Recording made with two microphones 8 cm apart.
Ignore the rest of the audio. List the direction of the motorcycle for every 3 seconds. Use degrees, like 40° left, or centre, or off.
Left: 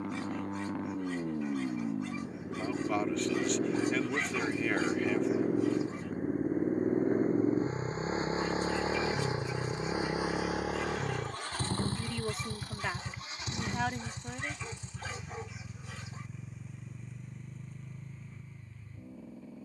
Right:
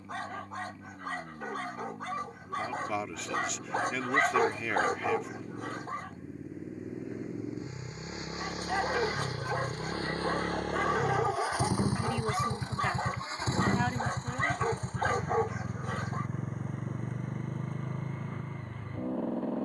70° left, 60° left, 40° left, 10° left, 30° right, 50° right, 60° right.